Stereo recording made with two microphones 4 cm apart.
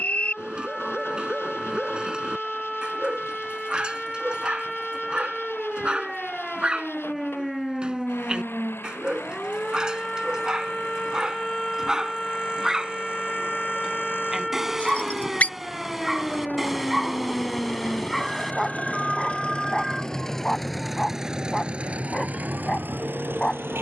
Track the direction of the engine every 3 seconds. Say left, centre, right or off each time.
left, left, left, left, left, left, left, right.